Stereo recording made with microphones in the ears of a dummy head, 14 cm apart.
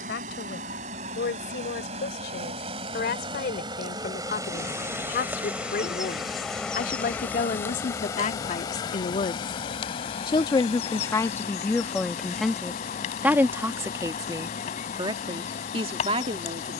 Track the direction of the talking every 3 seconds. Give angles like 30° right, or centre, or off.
80° left, 70° left, 50° left, 20° left, 10° right, 40° right.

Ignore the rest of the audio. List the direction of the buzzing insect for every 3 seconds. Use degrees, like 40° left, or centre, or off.
50° right, 20° right, 10° left, 40° left, 50° left, 50° left.